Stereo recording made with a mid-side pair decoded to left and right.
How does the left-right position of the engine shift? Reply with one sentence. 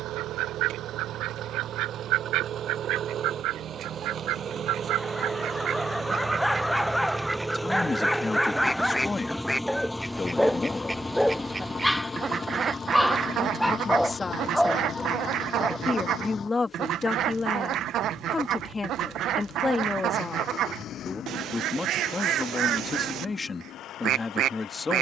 You can hear the engine go from the right side to the left.